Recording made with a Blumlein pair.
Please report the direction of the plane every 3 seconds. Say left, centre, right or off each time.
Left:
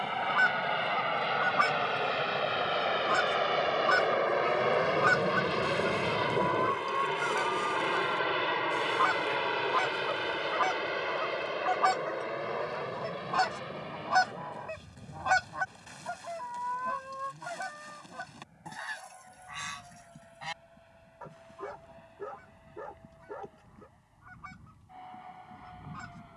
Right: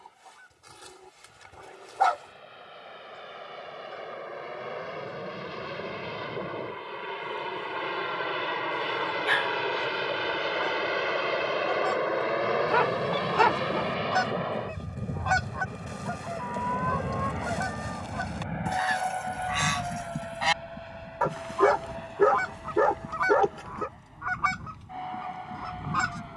left, left, centre, centre, right, right, right, right, right.